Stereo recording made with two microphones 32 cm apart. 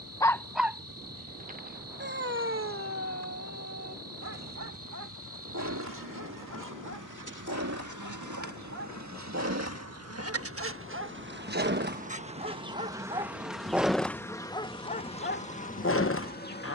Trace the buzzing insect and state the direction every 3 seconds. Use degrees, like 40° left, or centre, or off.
80° right, 80° right, 70° right, 40° right, centre, 30° left.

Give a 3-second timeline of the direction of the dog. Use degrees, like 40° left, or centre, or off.
20° right, 50° right, 50° right, 40° right, 10° right, 40° left.